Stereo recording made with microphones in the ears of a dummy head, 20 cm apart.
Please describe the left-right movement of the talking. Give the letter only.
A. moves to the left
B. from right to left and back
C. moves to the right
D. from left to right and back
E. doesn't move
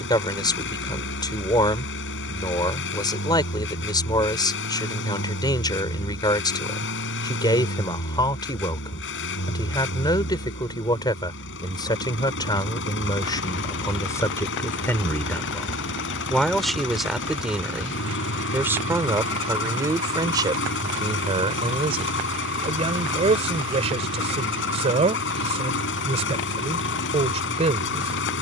C.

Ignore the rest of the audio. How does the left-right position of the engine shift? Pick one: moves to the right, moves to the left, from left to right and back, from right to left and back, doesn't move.
doesn't move.